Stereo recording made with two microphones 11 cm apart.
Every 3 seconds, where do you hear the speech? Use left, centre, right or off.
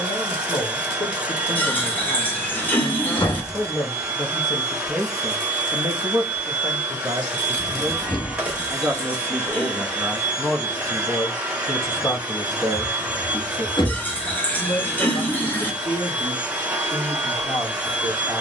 left, centre, right, centre, left, left.